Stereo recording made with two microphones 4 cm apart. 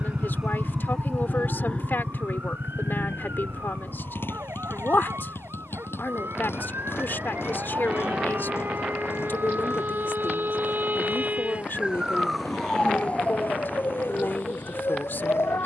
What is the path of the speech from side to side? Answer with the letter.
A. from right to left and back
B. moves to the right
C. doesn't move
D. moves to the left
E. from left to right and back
C.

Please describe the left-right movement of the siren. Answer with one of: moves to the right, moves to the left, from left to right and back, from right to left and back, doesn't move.
moves to the left.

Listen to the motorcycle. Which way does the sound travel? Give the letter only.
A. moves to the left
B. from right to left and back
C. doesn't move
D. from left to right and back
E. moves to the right
A.